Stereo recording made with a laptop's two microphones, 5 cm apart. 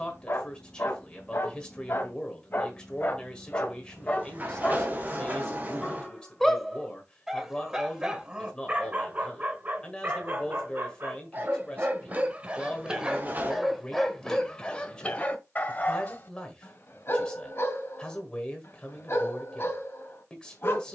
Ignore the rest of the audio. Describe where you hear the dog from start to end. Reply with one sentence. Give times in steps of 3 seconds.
You can hear the dog on the left from 0 s, in the centre from 6 s, on the right from 9 s, in the centre from 12 s and on the left from 15 s.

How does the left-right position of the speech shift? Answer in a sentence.
You can hear the speech stay put.